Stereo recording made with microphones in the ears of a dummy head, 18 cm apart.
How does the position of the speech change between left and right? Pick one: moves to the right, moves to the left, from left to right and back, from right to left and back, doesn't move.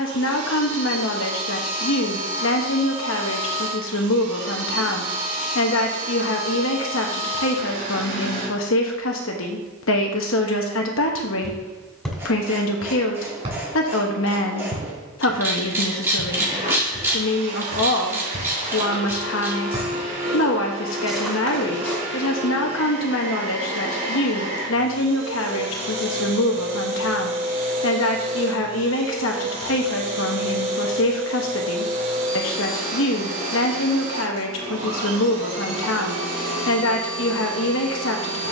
doesn't move.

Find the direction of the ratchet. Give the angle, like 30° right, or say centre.
10° right.